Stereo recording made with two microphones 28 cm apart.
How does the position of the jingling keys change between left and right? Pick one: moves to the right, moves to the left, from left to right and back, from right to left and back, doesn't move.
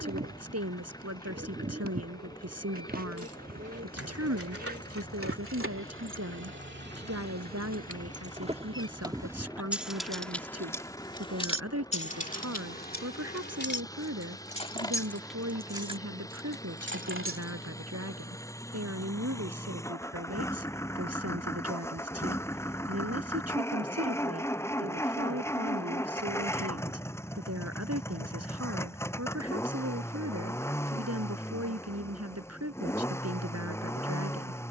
from right to left and back.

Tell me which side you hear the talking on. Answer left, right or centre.
right.